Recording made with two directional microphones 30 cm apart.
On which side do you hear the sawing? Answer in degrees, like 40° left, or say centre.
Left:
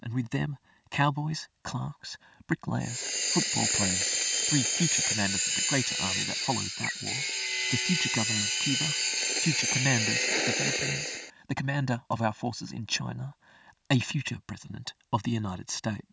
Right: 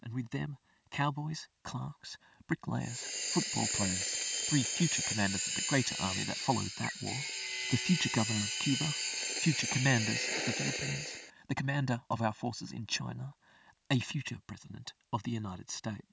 50° left.